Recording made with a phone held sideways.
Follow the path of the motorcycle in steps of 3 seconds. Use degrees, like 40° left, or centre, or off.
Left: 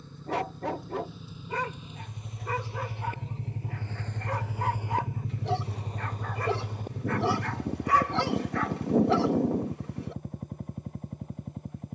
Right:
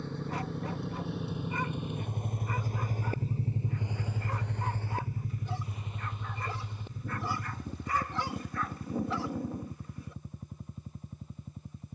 60° right, centre, 50° left, 60° left.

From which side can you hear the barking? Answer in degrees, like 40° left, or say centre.
80° left.